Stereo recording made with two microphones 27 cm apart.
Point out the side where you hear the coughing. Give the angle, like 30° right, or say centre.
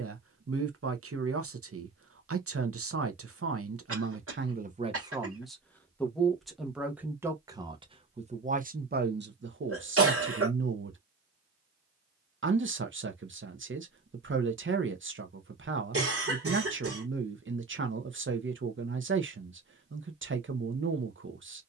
50° right.